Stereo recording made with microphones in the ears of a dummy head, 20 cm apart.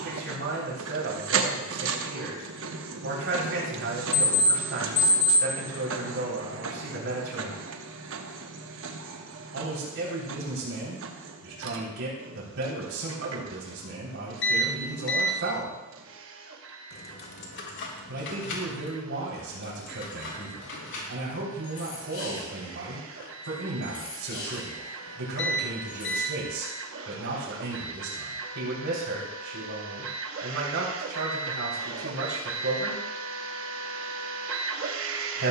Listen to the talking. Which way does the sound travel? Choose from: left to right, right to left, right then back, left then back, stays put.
stays put.